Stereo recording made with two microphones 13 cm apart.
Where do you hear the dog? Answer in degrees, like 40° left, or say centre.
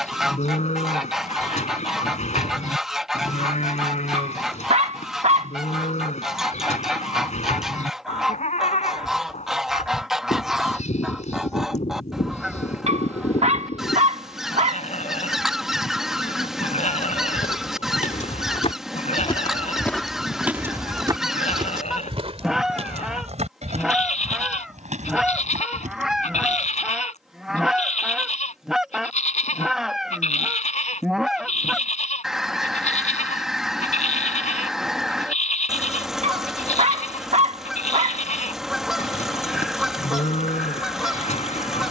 60° right.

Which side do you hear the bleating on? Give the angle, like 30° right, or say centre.
60° left.